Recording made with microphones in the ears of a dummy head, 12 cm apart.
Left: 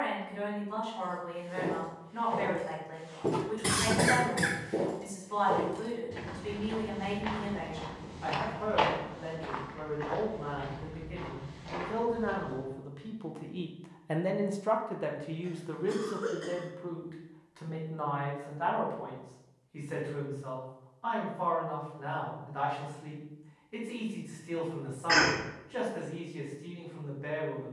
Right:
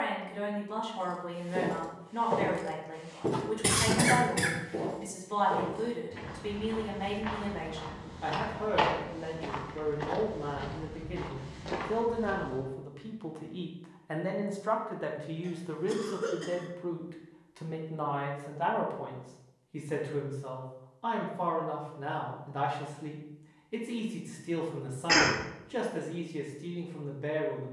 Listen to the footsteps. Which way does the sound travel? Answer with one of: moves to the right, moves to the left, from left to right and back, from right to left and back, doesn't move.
from right to left and back.